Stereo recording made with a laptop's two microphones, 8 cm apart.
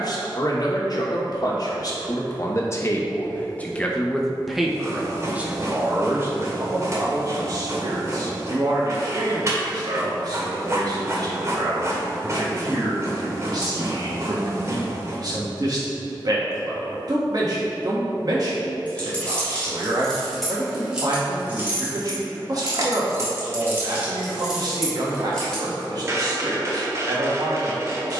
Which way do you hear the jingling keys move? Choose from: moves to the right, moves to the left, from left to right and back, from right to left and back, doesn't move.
from left to right and back.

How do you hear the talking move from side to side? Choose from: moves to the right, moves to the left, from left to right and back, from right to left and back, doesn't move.
moves to the right.